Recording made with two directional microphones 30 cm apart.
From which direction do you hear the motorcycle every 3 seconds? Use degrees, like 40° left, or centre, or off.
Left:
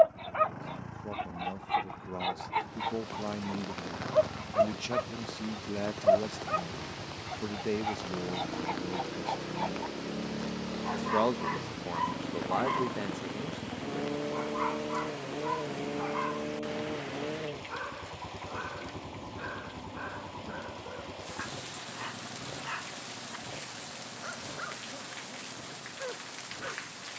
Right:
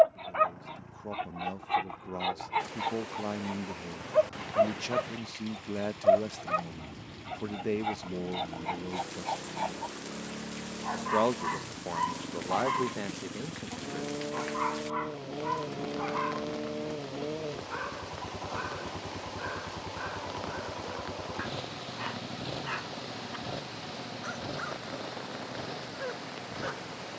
50° left, 50° left, 40° left, 30° left, 10° left, 10° right, 30° right, 50° right, 60° right.